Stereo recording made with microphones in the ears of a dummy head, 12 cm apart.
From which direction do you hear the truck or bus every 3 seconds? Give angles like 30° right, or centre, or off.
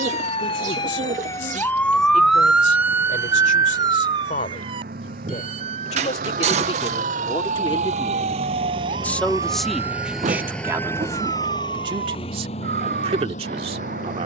80° right, 70° right, 50° right, centre, 50° left.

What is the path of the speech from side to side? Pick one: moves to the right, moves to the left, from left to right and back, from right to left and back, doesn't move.
moves to the right.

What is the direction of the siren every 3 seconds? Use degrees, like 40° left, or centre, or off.
20° left, 30° right, 50° right, 60° right, 60° right.